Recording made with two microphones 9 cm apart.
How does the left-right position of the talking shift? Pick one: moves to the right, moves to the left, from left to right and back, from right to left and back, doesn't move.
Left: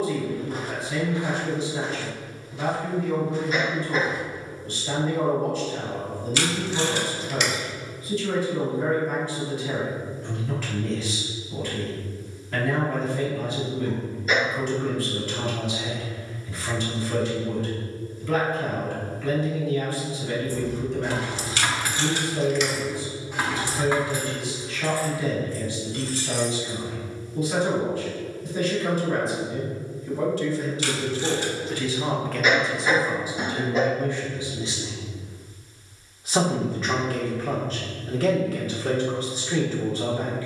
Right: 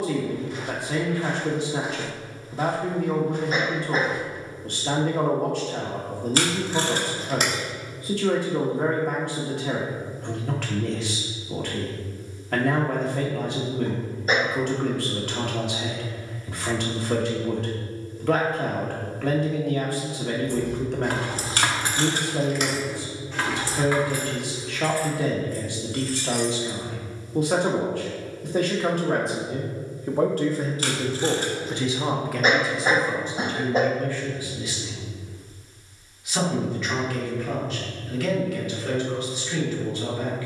moves to the left.